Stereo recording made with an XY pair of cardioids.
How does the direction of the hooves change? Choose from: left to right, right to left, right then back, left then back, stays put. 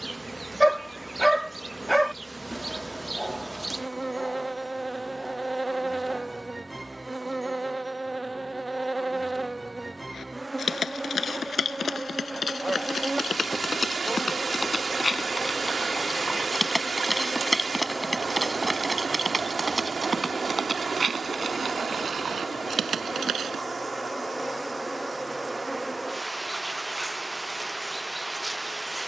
left to right.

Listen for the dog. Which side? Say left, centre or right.
centre.